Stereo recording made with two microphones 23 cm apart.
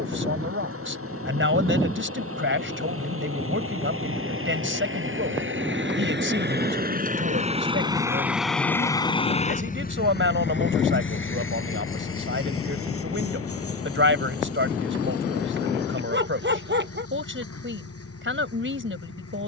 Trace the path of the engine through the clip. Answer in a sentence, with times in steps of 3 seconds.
You can hear the engine on the right from 0 s and on the left from 9 s.